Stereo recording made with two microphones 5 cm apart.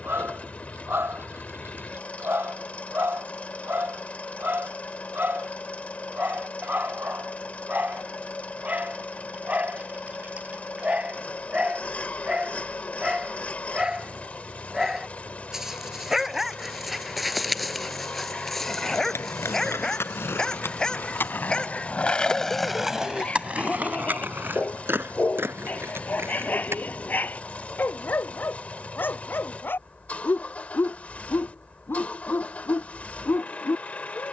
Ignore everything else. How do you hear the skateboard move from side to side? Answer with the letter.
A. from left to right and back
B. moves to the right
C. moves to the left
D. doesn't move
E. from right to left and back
B.